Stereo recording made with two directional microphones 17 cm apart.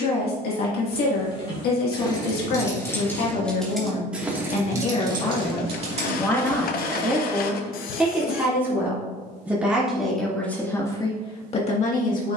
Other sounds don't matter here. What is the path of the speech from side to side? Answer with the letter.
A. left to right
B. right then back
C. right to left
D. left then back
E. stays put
B.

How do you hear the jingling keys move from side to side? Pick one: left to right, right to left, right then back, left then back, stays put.
left to right.